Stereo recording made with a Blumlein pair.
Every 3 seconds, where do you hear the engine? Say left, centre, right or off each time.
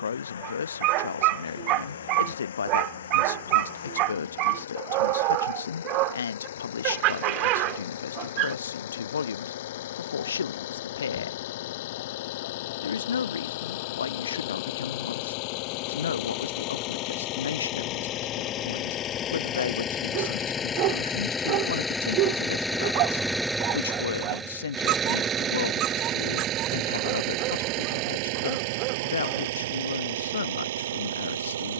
left, left, left, left, left, left, left, centre, right, right, right.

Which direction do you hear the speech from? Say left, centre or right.
left.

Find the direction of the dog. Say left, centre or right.
right.